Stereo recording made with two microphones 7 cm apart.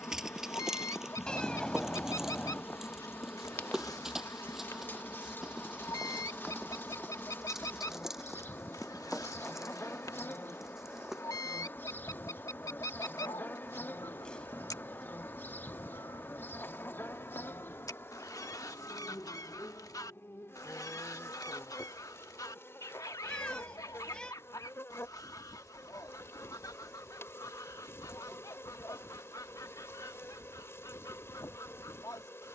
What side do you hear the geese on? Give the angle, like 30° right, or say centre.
50° left.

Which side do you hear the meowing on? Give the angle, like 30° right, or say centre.
10° left.